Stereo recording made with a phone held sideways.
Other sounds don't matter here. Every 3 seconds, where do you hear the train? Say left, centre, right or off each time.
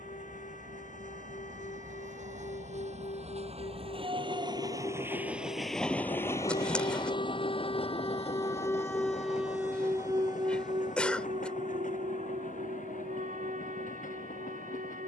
right, right, left, left, left.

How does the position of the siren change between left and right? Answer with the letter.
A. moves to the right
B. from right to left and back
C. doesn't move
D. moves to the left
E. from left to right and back
A.